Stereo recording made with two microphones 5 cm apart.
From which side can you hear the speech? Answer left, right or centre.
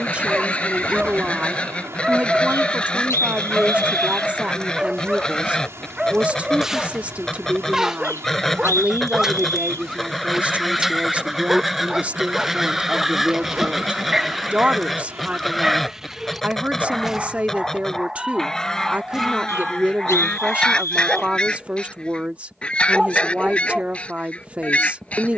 right.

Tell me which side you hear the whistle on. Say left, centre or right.
left.